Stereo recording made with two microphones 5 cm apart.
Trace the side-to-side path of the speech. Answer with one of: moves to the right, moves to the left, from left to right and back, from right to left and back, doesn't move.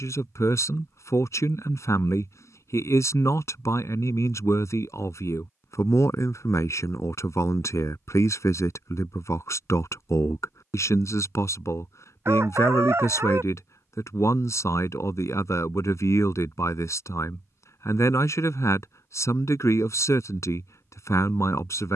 doesn't move.